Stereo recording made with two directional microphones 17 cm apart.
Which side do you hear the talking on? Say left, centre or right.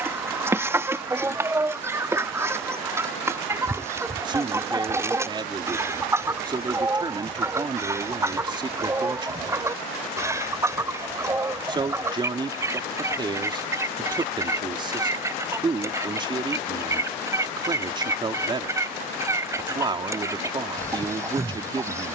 right.